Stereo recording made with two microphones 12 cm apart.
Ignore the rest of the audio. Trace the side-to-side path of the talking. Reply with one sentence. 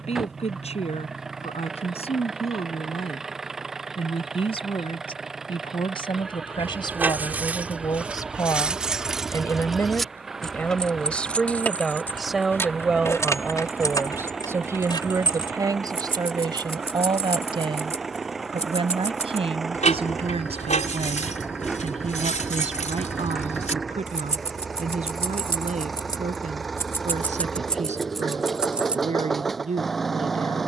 In this clip you hear the talking go from the left side to the right.